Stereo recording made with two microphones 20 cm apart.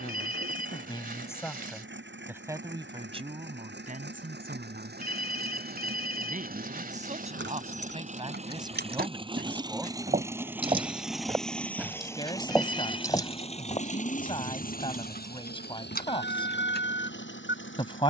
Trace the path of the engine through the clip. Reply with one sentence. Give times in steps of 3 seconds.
In this clip you hear the engine on the right from 0 s, in the centre from 9 s and on the left from 12 s.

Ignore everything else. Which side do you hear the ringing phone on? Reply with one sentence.
You can hear the ringing phone on the right.